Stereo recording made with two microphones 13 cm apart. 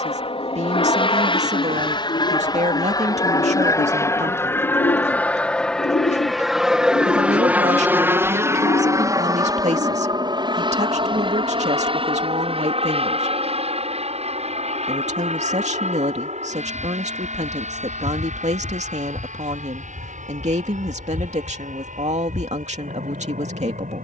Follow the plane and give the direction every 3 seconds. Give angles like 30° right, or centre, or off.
40° left, 20° left, 10° right, 30° right, 50° right, 60° right, 60° right, 70° right.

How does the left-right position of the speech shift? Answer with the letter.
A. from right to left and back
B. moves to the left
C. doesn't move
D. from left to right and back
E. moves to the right
C.